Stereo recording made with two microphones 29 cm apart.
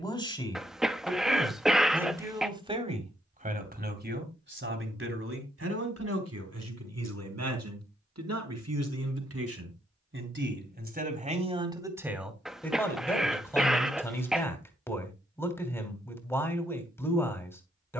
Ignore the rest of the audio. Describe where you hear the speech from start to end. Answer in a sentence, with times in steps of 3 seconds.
You can hear the speech in the centre from 0 s, on the right from 3 s and in the centre from 12 s.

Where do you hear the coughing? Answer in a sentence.
You can hear the coughing in the centre.